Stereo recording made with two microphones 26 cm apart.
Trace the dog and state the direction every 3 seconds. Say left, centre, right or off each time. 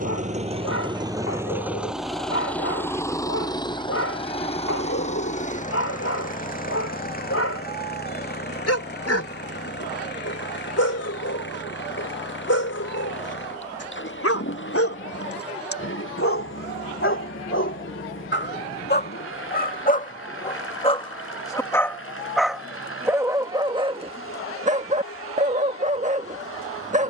left, left, left, left, left, left, left, centre, right.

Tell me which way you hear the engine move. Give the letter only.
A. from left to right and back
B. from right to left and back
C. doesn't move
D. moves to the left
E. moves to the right
D.